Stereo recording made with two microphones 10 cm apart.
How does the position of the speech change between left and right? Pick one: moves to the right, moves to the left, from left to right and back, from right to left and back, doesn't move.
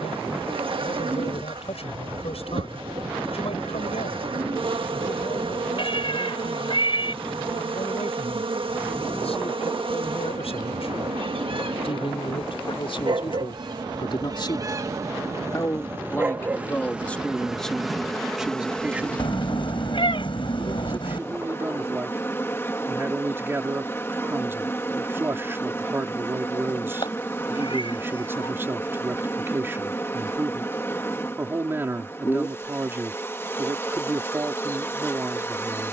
moves to the right.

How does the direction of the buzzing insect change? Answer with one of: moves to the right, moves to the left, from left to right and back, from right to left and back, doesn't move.
moves to the left.